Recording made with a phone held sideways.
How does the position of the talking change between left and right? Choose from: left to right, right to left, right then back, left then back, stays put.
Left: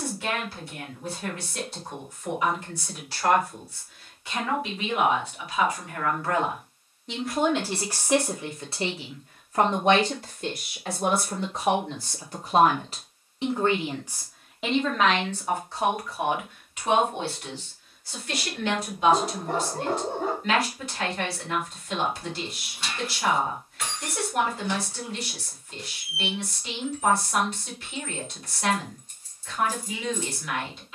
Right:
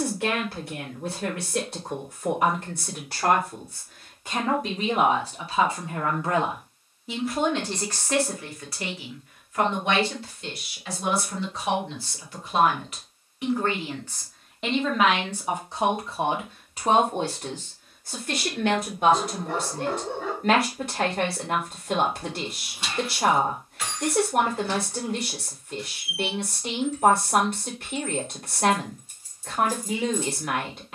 left then back.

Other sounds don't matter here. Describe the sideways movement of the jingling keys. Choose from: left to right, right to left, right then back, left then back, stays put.
left then back.